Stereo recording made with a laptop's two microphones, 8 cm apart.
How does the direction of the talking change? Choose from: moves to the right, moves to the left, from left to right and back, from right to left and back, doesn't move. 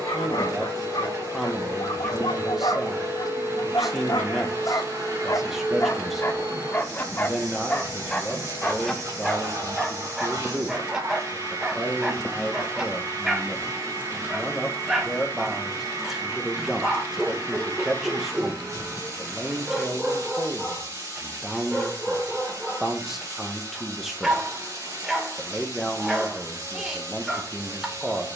doesn't move.